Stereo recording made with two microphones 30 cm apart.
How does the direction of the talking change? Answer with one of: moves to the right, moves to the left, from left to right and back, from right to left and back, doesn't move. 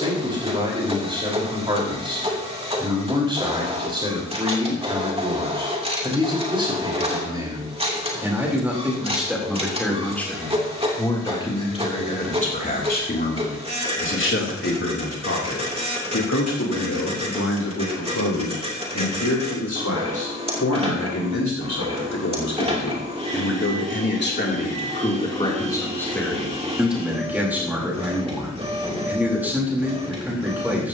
from right to left and back.